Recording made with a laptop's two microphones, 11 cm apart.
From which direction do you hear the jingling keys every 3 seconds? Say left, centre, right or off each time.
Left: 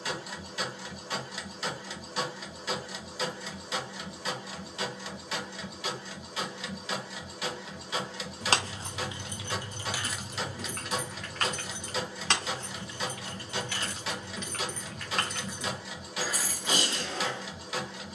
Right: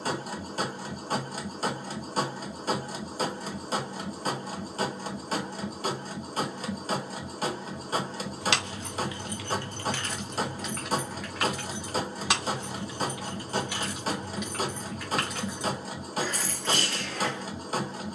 off, off, left, centre, centre, centre.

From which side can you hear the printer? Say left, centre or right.
right.